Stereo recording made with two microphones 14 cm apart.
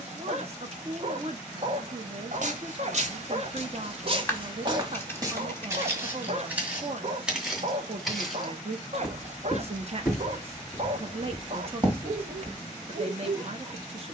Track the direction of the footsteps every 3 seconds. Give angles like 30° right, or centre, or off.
60° right, 40° right, 10° right, 10° right, 50° right.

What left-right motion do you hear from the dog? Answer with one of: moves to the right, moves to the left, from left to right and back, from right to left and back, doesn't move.
doesn't move.